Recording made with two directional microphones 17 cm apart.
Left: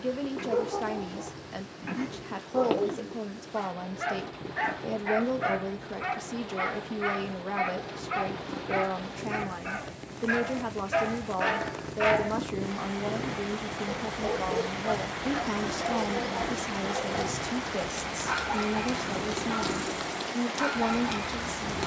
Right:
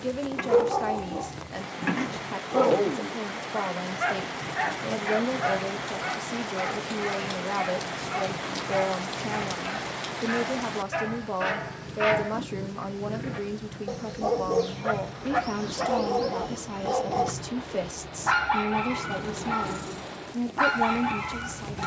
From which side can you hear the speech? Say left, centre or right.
centre.